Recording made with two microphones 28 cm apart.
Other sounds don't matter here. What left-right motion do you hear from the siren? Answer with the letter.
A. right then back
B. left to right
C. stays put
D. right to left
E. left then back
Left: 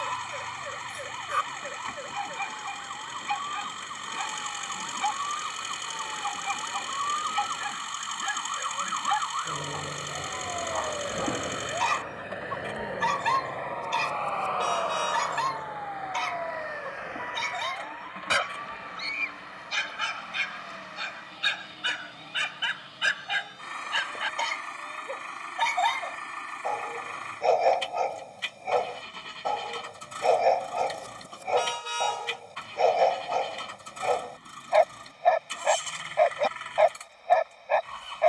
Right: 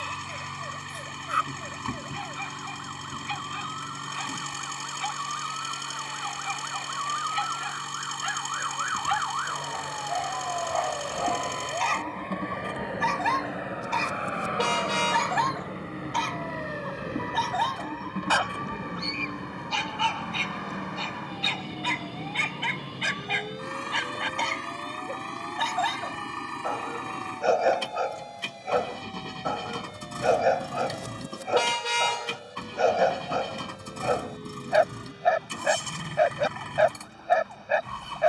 B.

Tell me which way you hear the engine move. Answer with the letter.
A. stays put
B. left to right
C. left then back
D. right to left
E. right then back
A.